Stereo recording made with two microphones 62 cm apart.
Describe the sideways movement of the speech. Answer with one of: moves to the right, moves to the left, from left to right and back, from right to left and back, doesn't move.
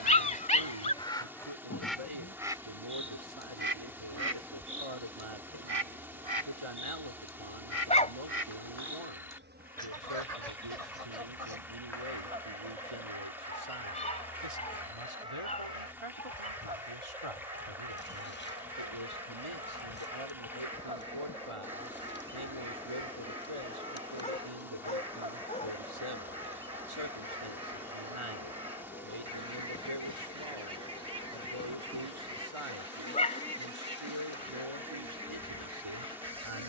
doesn't move.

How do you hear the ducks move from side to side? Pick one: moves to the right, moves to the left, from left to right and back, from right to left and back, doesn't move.
moves to the right.